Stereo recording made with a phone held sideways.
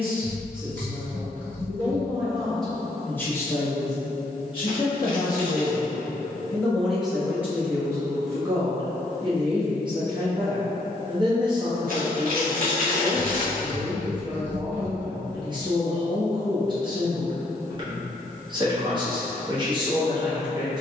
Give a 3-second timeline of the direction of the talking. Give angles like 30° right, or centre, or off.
20° right, 20° left, 10° right, 30° right, 30° right, 30° right, 30° right.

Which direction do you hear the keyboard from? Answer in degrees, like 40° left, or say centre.
10° left.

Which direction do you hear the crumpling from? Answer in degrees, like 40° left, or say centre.
70° right.